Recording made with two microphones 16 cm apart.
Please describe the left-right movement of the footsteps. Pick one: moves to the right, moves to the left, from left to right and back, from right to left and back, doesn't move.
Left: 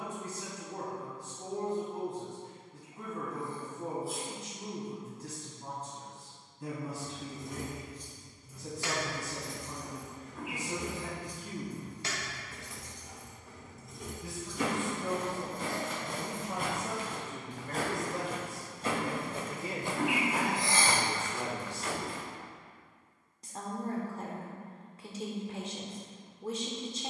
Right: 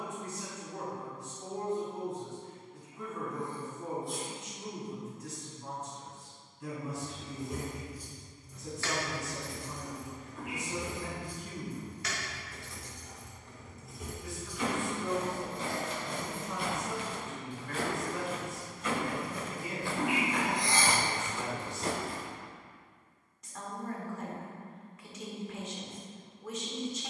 moves to the right.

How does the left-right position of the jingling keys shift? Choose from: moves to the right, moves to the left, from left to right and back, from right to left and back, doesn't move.
from right to left and back.